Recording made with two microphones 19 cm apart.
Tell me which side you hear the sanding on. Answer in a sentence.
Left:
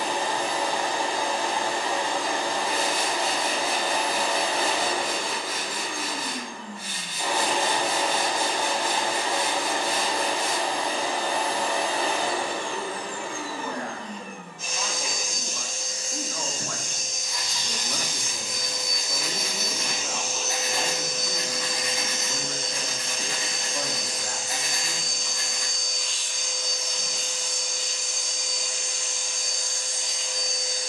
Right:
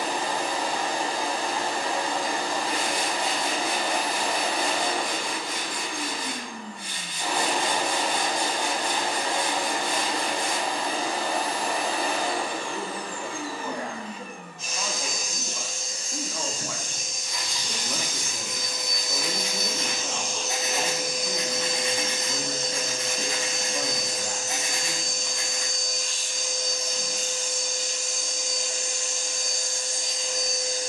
You can hear the sanding in the centre.